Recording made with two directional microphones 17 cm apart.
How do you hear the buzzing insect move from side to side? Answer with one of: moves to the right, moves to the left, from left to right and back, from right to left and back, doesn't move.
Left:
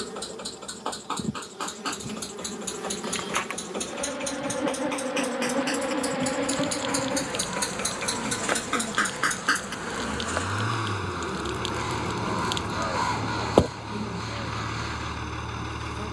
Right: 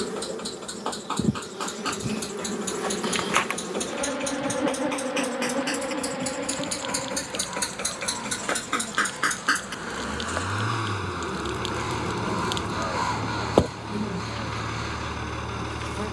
from right to left and back.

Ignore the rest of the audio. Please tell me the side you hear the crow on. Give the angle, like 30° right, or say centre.
centre.